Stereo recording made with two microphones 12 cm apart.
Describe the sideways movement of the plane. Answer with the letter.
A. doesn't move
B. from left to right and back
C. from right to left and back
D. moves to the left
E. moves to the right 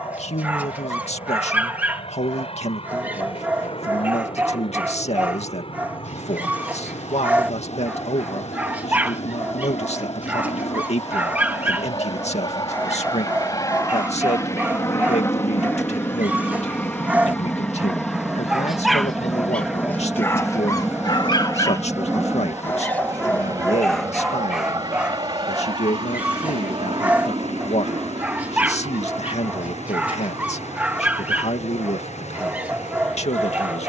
E.